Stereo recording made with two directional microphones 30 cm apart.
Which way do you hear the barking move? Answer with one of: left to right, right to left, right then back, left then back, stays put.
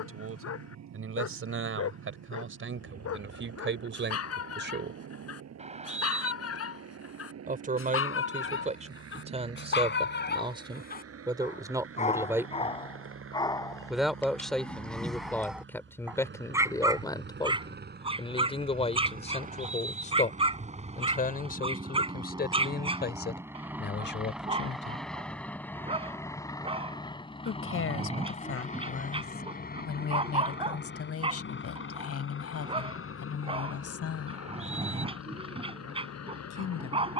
left to right.